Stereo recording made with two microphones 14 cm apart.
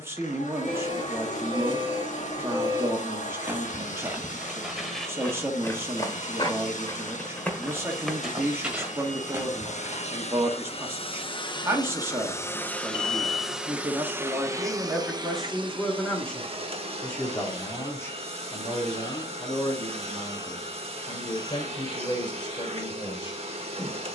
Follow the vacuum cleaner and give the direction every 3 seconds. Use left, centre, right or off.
left, left, left, left, centre, right, right, right.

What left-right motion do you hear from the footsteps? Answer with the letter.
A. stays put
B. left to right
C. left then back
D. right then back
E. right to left
C.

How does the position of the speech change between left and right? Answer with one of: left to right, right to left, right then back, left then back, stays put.
right to left.